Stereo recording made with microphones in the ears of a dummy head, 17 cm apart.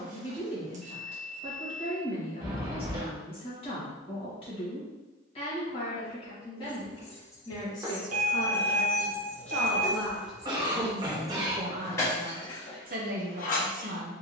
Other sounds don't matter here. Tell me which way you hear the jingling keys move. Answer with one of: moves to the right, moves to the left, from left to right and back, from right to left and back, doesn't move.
from left to right and back.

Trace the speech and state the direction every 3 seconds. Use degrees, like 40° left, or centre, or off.
30° left, 30° left, 20° left, 10° right, 50° right.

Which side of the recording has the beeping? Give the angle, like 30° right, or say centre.
40° right.